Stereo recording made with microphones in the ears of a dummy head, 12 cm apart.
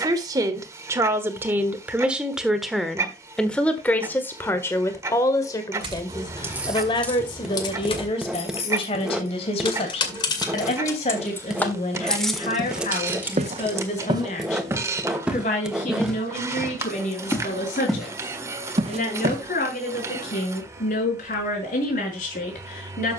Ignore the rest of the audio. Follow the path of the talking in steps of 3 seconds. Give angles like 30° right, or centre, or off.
10° right, 20° left, 40° left, 50° left, 50° left, 60° left, 60° left, 60° left.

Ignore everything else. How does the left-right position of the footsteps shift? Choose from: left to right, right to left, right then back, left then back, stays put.
left then back.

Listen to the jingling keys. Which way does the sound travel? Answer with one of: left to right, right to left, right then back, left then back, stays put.
left then back.